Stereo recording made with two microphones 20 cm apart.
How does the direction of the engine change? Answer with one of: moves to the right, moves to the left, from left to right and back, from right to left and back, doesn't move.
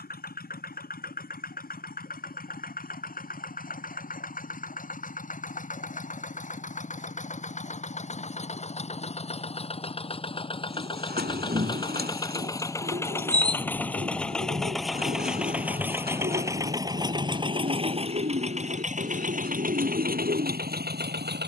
moves to the right.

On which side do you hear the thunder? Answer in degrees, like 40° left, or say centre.
40° right.